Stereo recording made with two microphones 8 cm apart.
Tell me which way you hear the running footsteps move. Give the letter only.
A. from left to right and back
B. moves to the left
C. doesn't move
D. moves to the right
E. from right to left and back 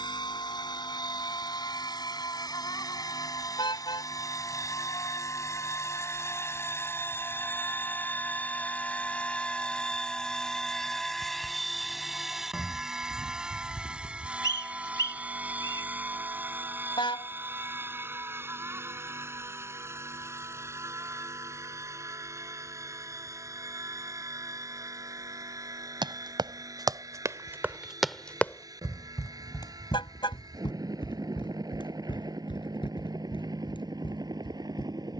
B.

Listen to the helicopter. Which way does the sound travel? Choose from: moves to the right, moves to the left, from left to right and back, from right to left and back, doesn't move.
moves to the right.